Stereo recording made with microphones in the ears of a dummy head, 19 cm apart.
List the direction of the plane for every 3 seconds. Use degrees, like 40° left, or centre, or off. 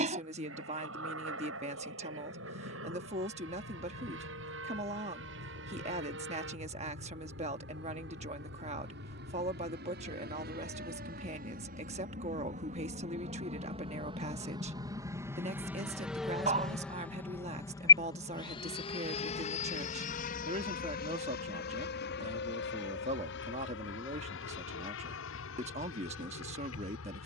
70° right, 70° right, 60° right, 50° right, 30° right, centre, 30° left, 50° left, 60° left.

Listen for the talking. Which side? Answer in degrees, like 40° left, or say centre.
30° right.